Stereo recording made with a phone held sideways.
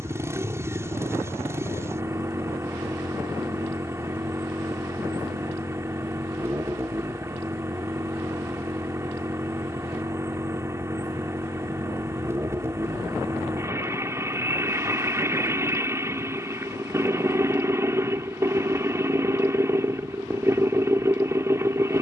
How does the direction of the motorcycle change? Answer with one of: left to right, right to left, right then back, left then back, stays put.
stays put.